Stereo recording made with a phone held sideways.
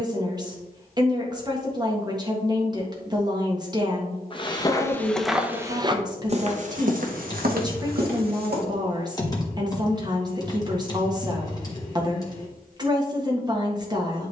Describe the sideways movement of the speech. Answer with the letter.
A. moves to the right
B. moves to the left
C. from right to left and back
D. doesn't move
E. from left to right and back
D.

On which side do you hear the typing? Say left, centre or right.
left.